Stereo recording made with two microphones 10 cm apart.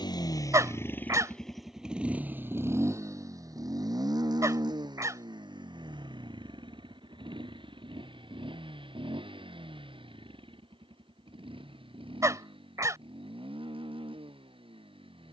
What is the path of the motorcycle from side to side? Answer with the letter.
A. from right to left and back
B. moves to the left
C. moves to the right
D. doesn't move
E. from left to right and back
C.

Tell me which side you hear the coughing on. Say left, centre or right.
right.